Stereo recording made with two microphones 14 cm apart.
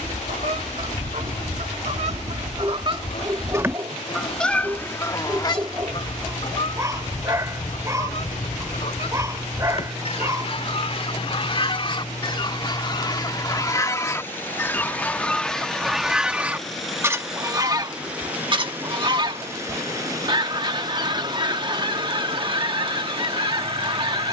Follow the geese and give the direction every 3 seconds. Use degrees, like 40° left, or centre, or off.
50° right, 10° left, 50° left, 40° left, 30° left, 10° right, 40° right, 40° right.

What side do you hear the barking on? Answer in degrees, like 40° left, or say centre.
20° right.